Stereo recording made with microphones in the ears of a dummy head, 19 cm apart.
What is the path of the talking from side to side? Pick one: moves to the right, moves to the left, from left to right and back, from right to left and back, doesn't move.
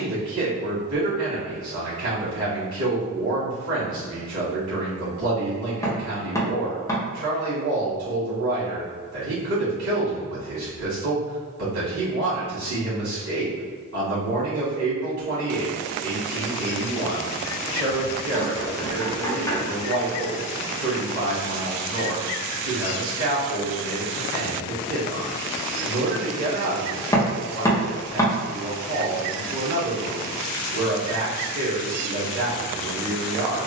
doesn't move.